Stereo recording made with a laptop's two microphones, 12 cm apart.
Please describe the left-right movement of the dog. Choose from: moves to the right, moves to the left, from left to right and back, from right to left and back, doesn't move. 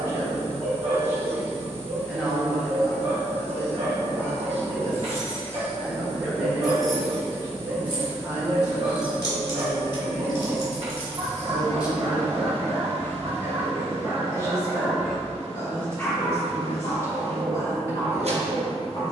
moves to the left.